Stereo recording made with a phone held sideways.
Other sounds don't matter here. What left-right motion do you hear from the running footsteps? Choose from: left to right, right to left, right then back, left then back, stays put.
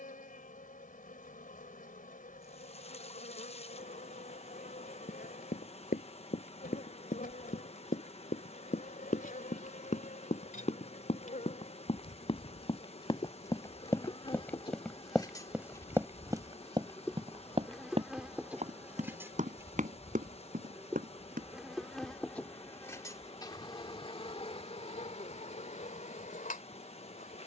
left to right.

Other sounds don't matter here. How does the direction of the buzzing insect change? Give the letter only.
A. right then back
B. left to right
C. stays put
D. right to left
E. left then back
A.